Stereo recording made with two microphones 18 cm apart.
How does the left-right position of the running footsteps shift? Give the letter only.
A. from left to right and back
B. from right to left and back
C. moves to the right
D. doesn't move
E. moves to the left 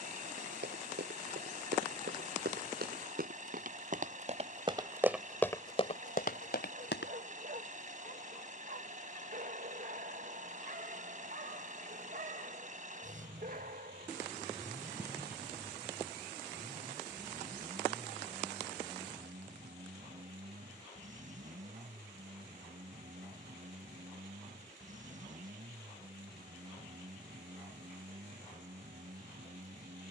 E.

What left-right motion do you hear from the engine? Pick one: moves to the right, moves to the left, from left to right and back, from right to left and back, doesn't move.
doesn't move.